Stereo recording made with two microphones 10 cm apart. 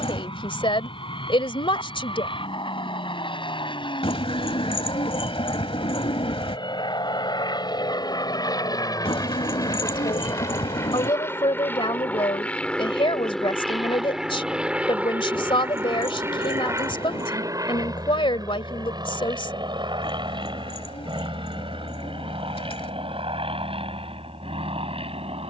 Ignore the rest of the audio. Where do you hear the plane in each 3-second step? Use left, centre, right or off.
left, left, left, left, centre, right, right, right, right.